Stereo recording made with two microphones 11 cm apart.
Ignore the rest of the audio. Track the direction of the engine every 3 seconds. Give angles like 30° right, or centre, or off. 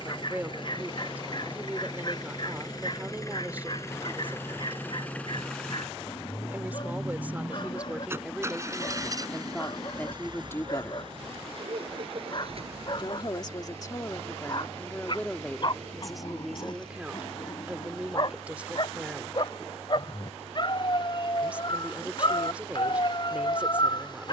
40° left, 20° left, 10° right, 40° right, 60° right, 70° right, 80° right, 80° right.